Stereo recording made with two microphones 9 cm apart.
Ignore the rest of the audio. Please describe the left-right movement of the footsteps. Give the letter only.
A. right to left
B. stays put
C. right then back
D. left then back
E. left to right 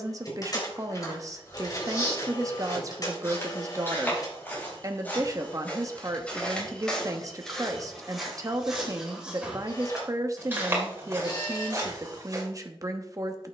E.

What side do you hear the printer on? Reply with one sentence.
You can hear the printer on the left.